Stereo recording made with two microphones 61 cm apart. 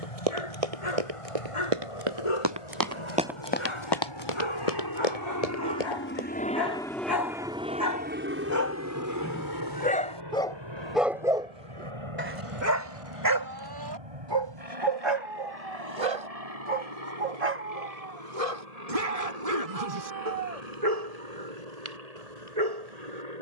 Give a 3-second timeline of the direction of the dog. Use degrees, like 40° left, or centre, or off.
60° left, 50° left, 30° left, centre, 30° right, 60° right, 70° right, 80° right.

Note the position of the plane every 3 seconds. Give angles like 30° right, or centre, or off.
70° left, 40° left, 10° right, 40° right, 50° right, 60° right, 70° right, 70° right.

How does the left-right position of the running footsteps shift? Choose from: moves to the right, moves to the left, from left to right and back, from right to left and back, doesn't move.
moves to the left.